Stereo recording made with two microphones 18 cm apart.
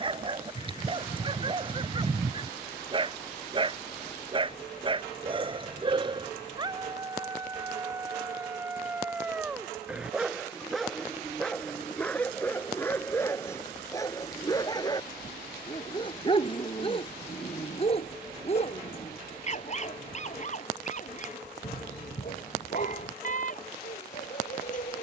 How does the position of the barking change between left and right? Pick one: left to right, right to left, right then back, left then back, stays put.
right to left.